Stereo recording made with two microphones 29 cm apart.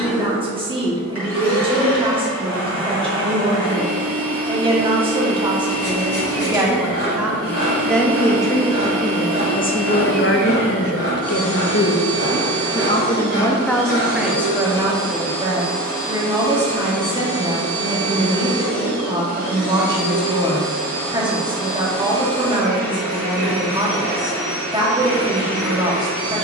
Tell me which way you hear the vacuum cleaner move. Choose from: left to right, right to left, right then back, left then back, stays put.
stays put.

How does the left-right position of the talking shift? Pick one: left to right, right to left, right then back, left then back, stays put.
left then back.